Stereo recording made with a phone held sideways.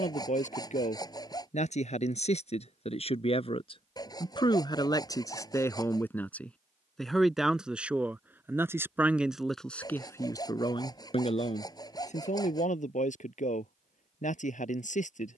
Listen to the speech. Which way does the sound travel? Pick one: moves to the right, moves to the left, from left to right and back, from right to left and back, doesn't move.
from left to right and back.